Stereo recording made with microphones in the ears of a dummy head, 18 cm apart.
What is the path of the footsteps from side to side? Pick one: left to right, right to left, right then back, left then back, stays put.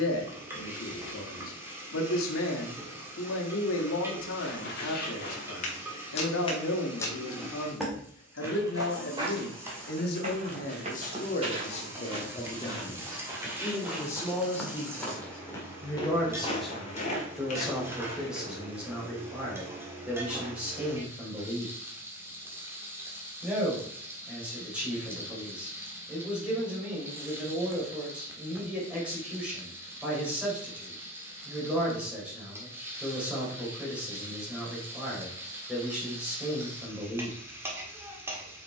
right then back.